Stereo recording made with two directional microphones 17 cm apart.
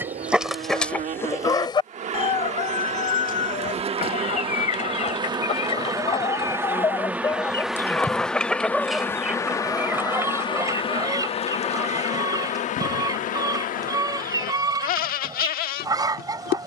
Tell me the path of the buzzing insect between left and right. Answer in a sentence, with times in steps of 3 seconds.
In this clip you hear the buzzing insect on the right from 0 s, in the centre from 6 s and on the left from 9 s.